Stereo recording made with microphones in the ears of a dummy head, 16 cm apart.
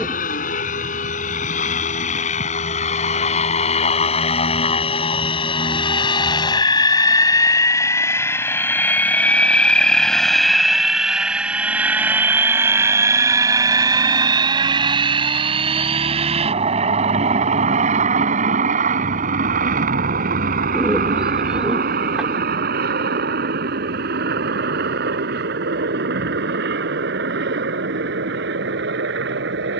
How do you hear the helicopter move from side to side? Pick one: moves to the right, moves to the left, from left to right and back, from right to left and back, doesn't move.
moves to the right.